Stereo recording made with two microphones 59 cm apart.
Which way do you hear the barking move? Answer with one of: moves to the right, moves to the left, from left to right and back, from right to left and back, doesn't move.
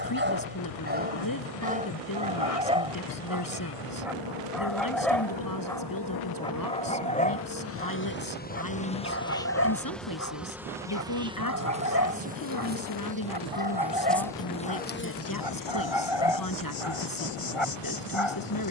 moves to the left.